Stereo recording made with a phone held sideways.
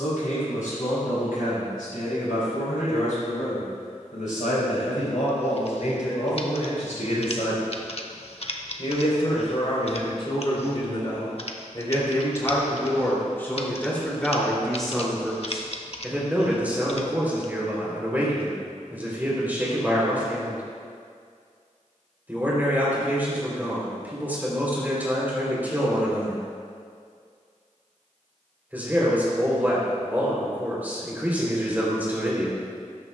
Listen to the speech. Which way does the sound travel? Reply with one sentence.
In this clip you hear the speech move to the right.